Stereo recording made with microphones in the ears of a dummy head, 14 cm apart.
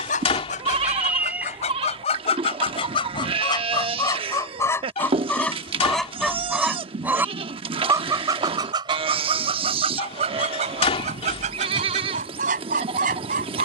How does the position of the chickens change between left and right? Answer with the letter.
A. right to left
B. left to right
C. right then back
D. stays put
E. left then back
B.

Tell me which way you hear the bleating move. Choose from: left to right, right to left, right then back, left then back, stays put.
stays put.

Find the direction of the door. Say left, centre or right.
left.